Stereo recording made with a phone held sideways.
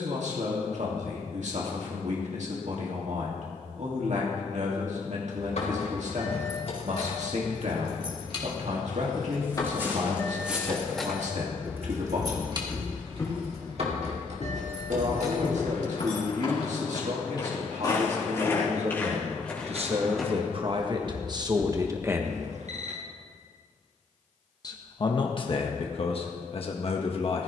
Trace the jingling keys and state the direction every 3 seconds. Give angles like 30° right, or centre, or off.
off, 60° left, 50° left, 10° left, 50° right, 70° right, off, off, off.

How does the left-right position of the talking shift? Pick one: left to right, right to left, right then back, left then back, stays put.
right to left.